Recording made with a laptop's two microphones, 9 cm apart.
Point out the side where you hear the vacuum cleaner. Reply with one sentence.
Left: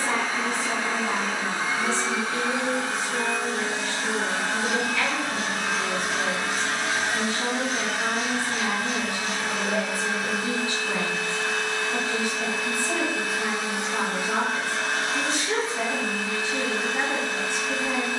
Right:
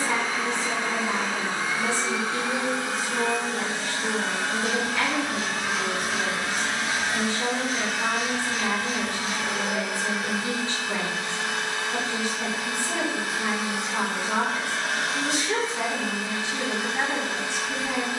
You can hear the vacuum cleaner on the left.